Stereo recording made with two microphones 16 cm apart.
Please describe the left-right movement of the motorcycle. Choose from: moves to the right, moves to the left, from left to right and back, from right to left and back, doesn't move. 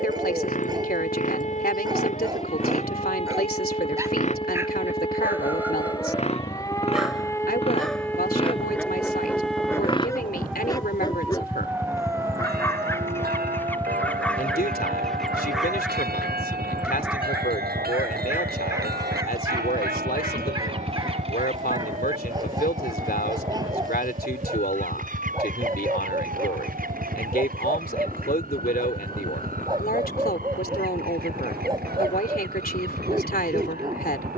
moves to the right.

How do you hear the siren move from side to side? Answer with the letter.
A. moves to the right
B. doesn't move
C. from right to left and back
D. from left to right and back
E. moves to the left
A.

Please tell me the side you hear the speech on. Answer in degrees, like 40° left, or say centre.
70° left.